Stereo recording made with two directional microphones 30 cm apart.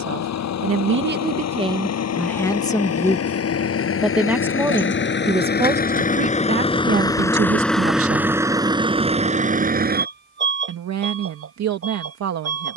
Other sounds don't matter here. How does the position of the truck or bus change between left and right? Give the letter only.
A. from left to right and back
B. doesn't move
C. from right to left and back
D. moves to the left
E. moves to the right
E.